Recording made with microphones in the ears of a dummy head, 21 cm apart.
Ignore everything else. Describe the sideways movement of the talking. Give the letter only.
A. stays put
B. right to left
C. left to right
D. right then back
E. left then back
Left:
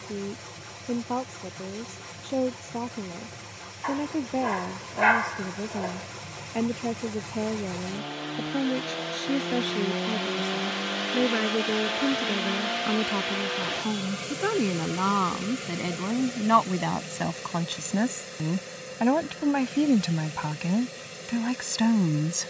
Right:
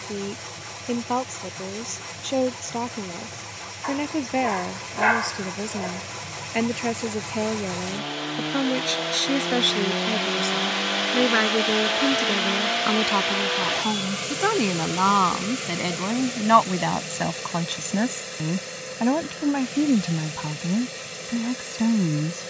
B.